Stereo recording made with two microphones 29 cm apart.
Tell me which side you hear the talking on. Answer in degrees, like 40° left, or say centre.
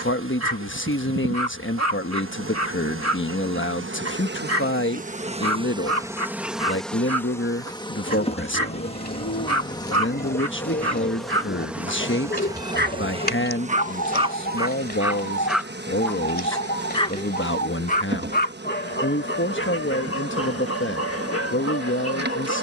40° left.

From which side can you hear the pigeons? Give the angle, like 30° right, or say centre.
30° left.